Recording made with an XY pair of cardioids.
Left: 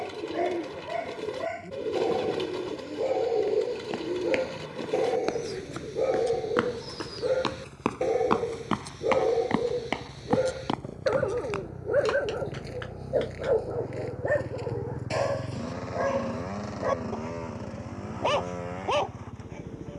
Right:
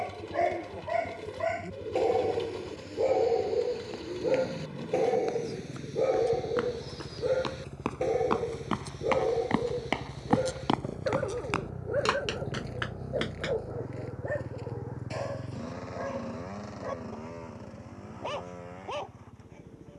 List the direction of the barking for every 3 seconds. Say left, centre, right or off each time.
right, centre, centre, left, left, left, left.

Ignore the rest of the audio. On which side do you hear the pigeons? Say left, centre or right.
left.